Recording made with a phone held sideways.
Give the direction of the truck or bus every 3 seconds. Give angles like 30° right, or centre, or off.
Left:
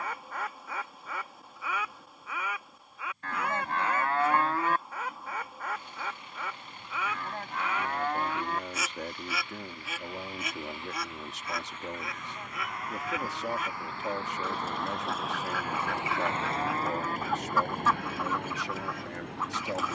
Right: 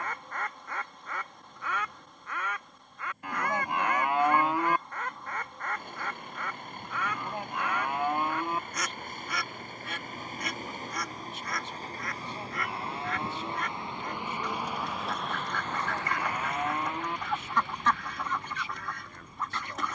60° right, 60° right, 50° right, 40° right, 20° right, 30° left, 70° left.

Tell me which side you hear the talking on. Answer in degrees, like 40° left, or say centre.
80° left.